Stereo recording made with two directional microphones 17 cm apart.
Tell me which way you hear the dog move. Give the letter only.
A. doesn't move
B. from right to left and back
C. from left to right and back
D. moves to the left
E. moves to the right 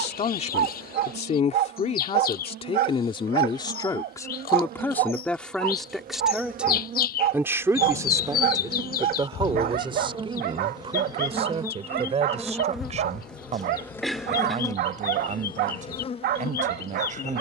A.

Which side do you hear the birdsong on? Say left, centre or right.
left.